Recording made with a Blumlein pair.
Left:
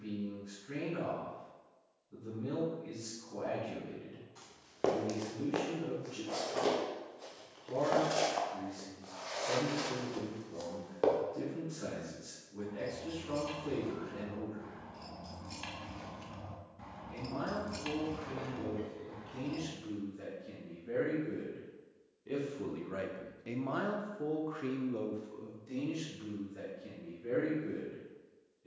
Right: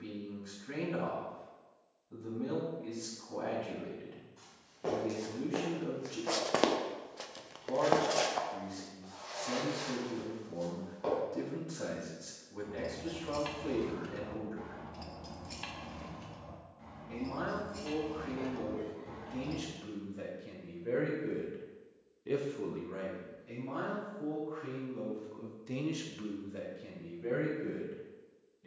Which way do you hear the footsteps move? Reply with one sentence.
In this clip you hear the footsteps go right and come back.